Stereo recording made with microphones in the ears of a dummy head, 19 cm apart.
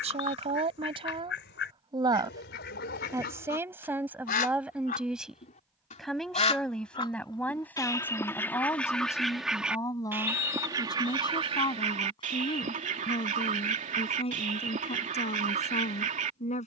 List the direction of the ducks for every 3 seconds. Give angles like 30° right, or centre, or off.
50° left, 40° left, 20° left, 10° right, 30° right, 30° right.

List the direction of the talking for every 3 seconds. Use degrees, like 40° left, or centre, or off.
20° right, 10° right, 10° left, 20° left, 30° left, 30° left.